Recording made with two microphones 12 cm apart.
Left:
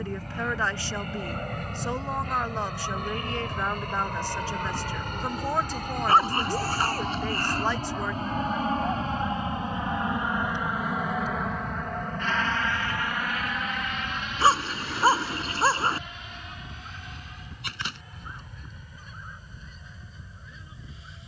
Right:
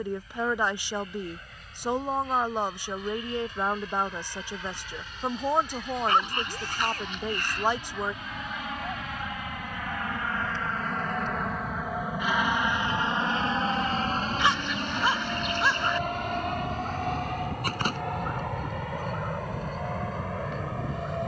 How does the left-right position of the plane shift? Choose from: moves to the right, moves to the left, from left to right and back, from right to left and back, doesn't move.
moves to the right.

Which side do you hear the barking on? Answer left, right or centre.
left.